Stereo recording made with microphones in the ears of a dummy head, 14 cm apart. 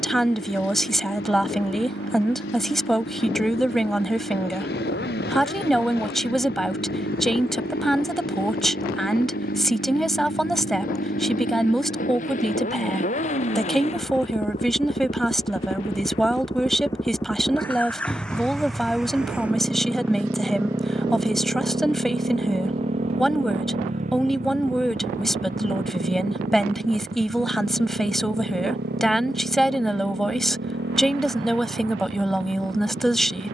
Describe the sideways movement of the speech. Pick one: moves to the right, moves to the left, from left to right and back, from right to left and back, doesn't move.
doesn't move.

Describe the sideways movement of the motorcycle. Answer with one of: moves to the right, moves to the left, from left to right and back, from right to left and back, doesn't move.
moves to the right.